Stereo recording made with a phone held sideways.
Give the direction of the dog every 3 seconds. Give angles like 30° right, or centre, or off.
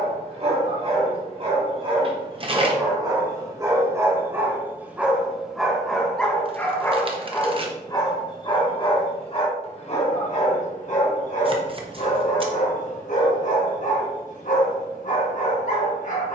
40° right, 10° right, 20° left, 50° left, 60° left, 60° left.